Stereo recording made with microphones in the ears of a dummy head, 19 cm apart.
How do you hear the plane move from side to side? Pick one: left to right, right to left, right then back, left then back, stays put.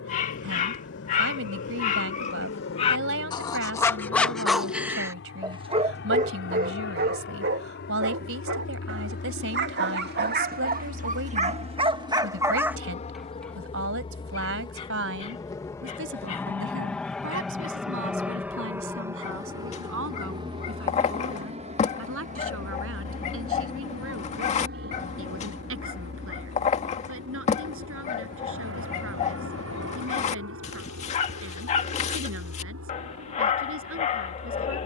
left to right.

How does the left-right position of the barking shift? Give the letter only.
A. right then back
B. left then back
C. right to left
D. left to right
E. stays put
A.